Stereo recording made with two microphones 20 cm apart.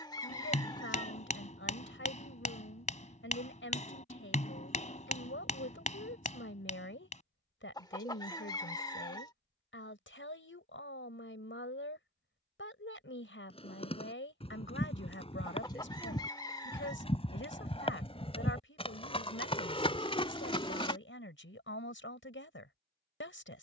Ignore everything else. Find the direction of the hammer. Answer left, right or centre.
left.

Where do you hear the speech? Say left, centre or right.
left.